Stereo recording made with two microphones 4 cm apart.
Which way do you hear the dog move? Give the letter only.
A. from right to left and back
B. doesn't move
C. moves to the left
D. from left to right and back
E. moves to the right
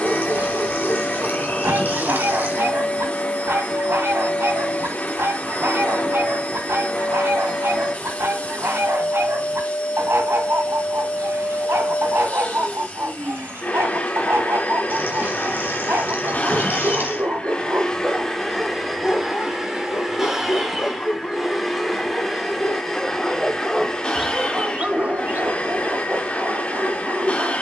A.